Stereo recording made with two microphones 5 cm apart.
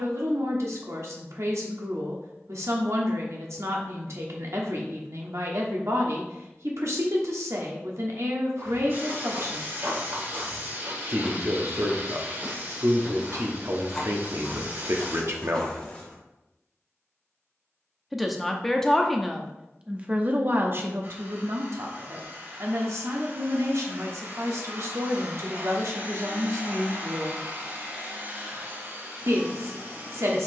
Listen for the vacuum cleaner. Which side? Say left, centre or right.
right.